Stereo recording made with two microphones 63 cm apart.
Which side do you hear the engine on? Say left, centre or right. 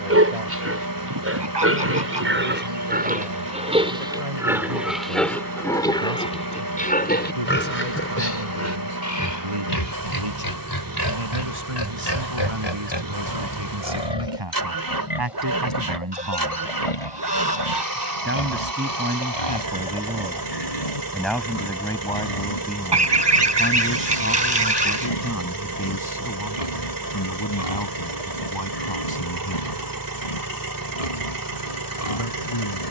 right.